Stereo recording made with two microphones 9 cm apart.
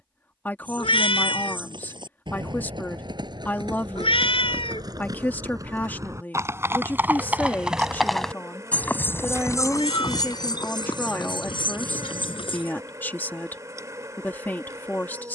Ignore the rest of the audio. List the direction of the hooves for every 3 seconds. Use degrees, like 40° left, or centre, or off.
60° right, 50° right, 10° right, 50° left, 70° left.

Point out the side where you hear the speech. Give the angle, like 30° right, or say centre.
20° left.